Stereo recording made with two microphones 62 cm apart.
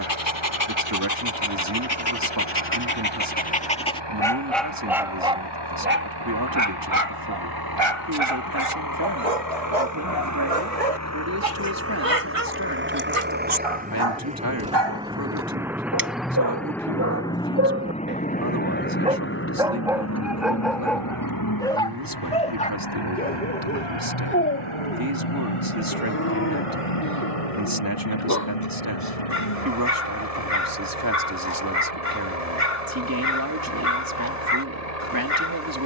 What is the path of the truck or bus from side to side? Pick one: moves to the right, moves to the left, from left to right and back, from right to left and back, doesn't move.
moves to the left.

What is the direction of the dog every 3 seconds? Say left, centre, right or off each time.
left, centre, right, right, right, right, centre, centre, left, left, left, left.